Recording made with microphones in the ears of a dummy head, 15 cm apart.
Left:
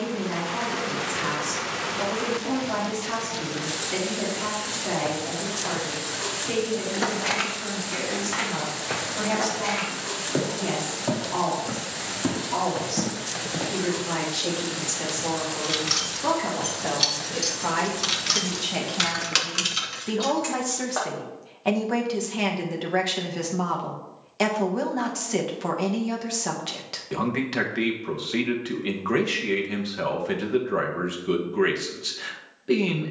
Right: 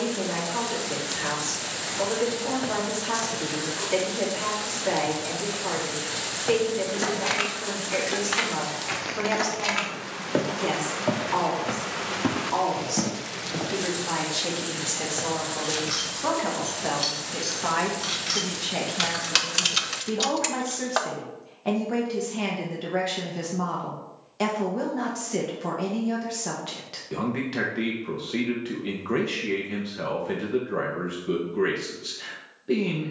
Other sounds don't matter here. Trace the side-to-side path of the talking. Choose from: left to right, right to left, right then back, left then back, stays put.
right to left.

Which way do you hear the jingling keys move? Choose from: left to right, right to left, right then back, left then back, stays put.
left to right.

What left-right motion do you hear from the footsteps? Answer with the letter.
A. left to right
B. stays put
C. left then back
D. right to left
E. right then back
E.